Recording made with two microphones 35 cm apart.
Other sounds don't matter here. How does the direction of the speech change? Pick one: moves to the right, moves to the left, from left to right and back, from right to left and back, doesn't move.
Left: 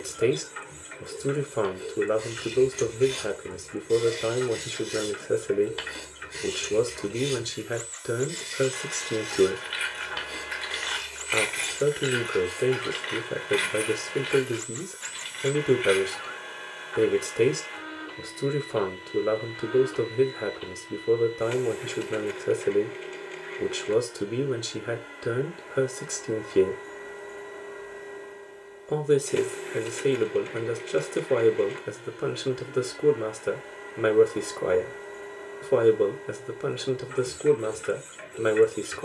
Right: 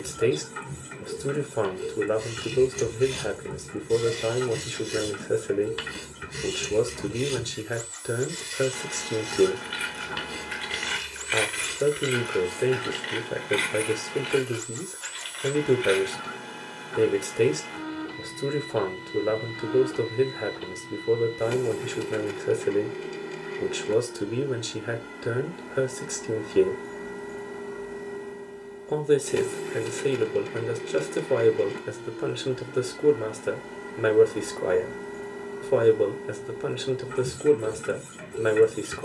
doesn't move.